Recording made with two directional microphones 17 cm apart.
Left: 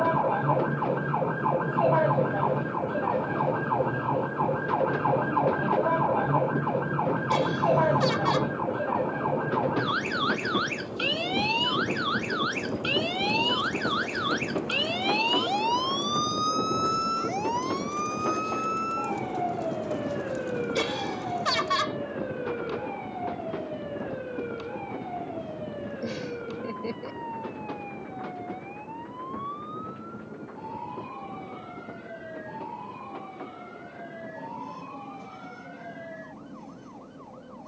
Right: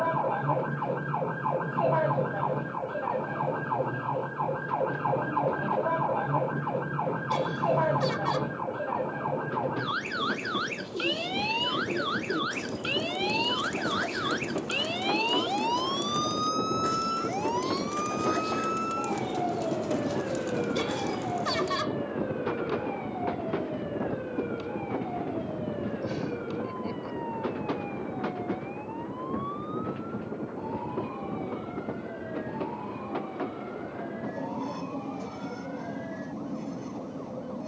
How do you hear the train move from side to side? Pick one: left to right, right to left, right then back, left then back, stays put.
left to right.